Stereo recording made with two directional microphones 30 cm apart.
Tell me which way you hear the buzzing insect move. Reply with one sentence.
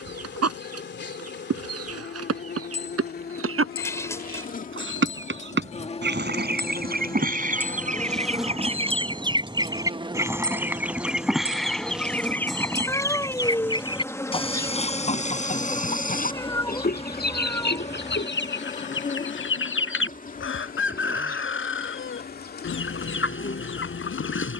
You can hear the buzzing insect go right and come back.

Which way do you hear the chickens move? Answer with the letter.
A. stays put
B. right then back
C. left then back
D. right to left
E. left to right
D.